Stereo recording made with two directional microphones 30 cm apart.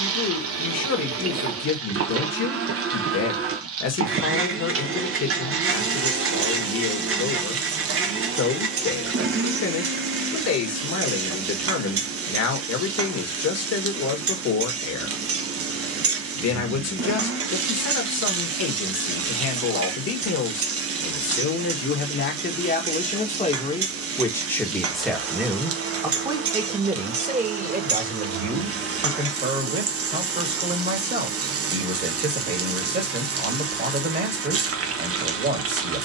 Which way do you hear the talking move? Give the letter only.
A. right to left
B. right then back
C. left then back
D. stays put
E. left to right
E.